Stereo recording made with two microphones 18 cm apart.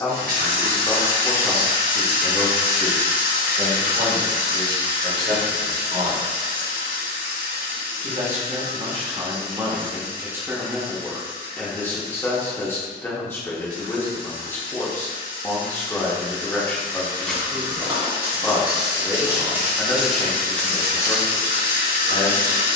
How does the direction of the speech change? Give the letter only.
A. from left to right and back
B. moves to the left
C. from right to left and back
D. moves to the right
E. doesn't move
A.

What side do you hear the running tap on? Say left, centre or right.
right.